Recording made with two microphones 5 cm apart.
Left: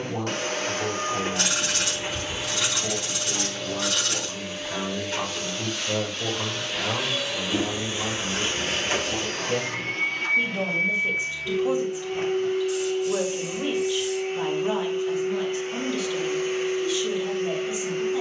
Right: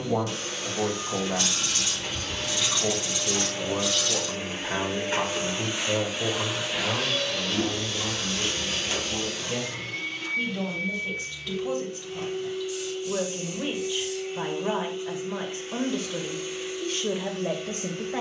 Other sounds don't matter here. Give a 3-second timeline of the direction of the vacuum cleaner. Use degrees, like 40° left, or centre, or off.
30° left, 20° right, 10° left, 40° left, 50° left, 50° left.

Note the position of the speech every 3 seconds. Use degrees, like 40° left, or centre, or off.
60° right, 30° right, 10° left, 20° left, 10° right, 40° right.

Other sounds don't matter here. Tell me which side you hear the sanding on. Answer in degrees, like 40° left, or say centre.
60° left.